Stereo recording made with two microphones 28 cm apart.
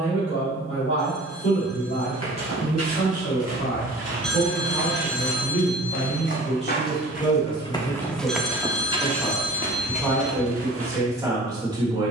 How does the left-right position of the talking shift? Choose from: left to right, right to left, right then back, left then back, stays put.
left to right.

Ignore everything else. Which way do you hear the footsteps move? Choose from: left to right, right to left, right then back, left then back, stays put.
left to right.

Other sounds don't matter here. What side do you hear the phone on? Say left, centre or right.
centre.